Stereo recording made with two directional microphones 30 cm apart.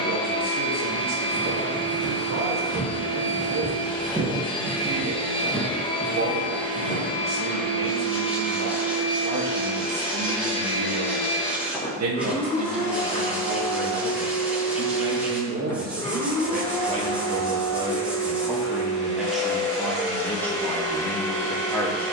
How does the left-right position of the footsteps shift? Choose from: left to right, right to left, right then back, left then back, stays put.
right to left.